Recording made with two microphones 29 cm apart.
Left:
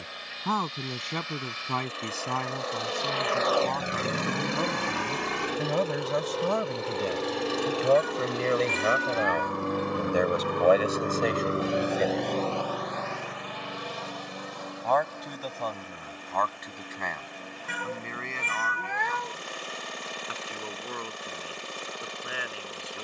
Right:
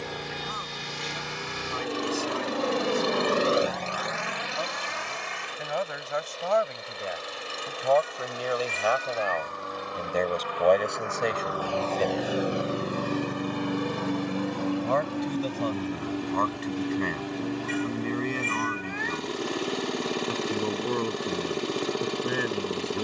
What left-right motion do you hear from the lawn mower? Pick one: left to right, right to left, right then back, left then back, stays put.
left then back.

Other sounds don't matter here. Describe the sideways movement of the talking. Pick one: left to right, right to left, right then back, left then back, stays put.
left to right.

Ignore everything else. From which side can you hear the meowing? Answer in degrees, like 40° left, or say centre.
70° left.